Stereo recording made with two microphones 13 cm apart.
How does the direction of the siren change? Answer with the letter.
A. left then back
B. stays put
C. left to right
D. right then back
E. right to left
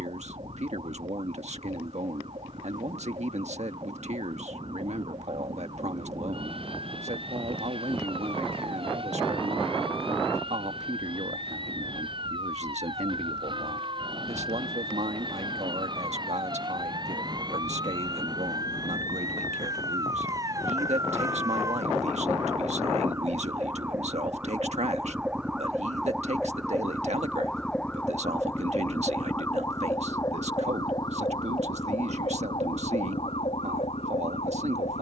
E.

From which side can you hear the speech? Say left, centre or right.
right.